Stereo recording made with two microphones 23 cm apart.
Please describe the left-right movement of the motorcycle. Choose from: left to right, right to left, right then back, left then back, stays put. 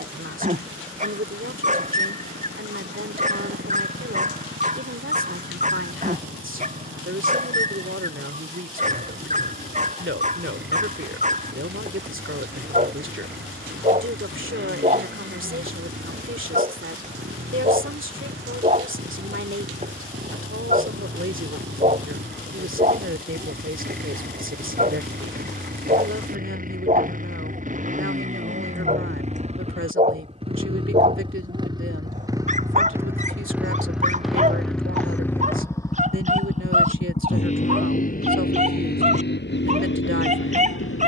right to left.